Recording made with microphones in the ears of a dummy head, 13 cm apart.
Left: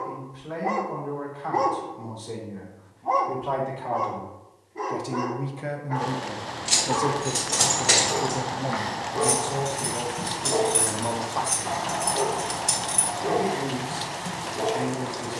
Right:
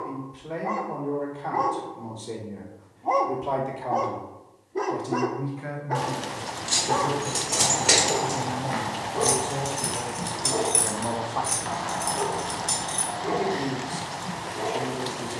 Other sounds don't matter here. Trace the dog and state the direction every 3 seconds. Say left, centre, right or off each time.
left, right, right, centre, left.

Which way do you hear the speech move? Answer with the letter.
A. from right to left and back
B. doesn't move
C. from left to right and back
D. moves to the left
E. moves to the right
A.